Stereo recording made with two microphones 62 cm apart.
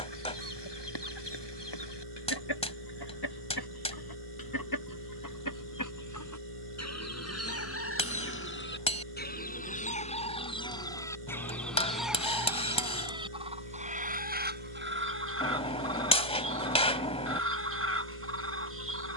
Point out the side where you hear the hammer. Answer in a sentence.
You can hear the hammer in the centre.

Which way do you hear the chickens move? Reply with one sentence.
In this clip you hear the chickens travel towards the right.